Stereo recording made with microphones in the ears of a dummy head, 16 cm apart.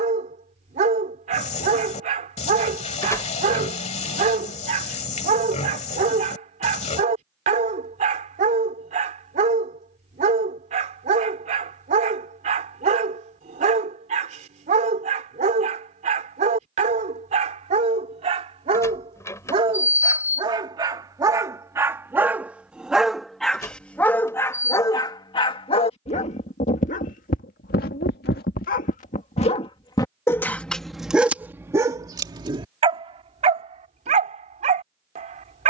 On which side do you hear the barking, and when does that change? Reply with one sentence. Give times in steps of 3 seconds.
In this clip you hear the barking on the right from 0 s, in the centre from 21 s, on the left from 24 s, in the centre from 30 s and on the right from 33 s.